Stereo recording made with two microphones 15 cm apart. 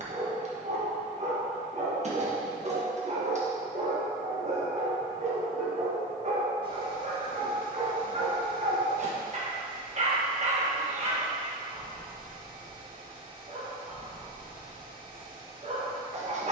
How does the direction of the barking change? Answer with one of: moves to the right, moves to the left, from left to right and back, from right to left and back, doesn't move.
doesn't move.